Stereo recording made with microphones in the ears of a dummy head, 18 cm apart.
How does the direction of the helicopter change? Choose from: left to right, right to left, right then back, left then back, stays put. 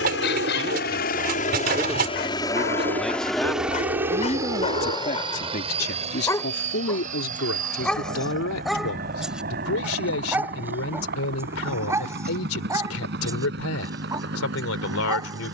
left to right.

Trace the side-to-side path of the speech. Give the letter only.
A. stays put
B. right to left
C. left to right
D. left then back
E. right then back
B.